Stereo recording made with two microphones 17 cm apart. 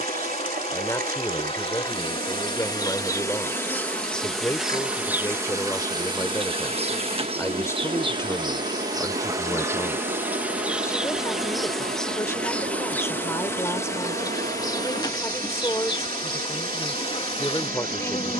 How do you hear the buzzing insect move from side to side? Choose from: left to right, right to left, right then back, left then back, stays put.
right then back.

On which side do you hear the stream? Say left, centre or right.
right.